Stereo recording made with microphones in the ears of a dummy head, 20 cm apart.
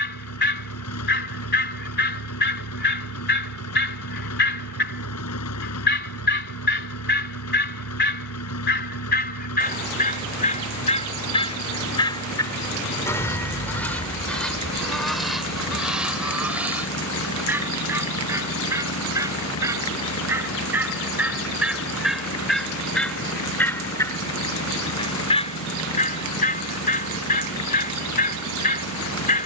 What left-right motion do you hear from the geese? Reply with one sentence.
You can hear the geese go right and come back.